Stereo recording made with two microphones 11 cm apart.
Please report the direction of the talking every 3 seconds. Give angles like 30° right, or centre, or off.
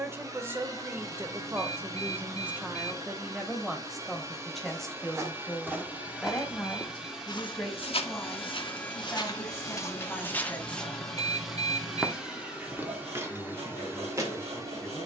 20° right, centre, 10° left, 20° left, 20° left.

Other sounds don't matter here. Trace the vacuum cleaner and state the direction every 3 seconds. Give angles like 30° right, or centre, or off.
30° right, 20° right, centre, 10° left, 20° right.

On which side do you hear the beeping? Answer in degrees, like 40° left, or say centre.
70° right.